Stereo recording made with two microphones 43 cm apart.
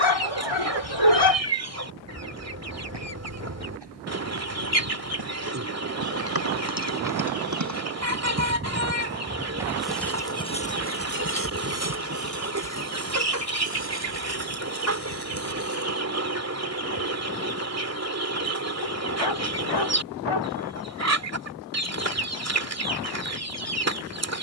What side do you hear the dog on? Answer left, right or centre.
left.